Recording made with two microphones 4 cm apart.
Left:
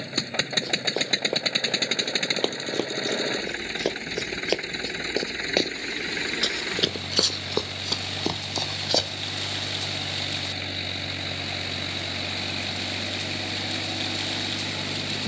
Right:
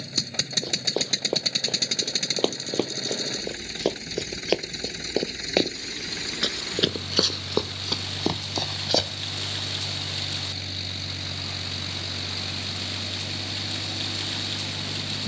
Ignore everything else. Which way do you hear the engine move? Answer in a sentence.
In this clip you hear the engine stay put.